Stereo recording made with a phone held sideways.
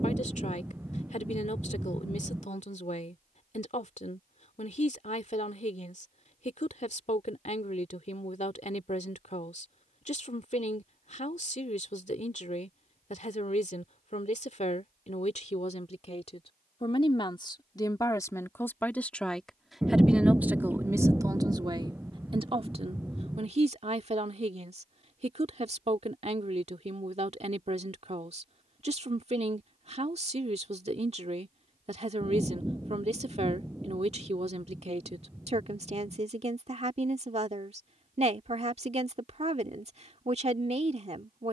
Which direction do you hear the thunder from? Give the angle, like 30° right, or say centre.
10° right.